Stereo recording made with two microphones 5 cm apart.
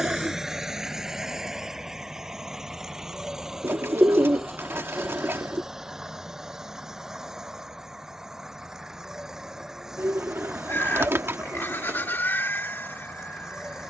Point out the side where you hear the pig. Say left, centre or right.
left.